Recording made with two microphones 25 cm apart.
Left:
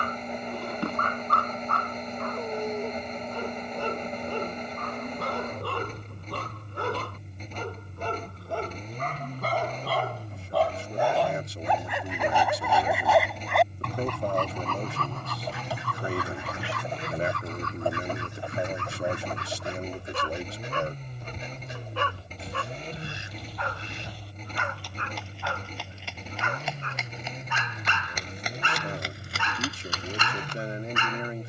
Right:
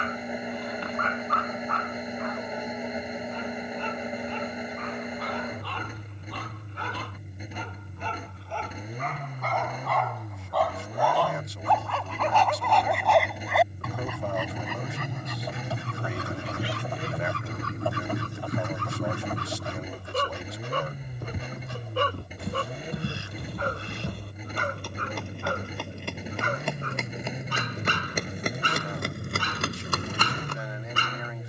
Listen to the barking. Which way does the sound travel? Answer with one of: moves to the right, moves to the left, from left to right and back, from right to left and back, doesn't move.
moves to the right.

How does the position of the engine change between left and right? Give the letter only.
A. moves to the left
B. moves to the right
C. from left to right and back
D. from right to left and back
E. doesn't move
E.